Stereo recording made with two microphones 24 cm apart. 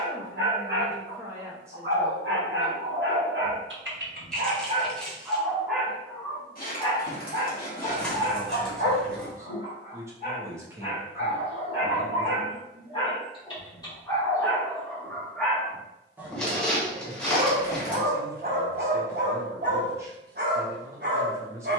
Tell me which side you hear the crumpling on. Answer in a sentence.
In this clip you hear the crumpling in the centre.